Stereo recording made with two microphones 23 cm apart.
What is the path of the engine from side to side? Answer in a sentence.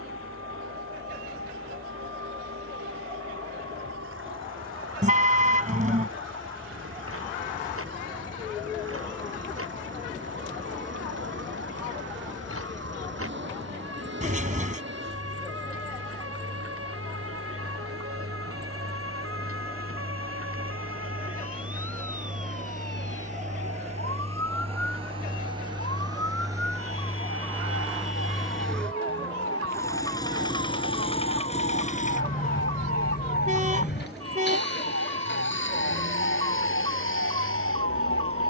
You can hear the engine move from right to left.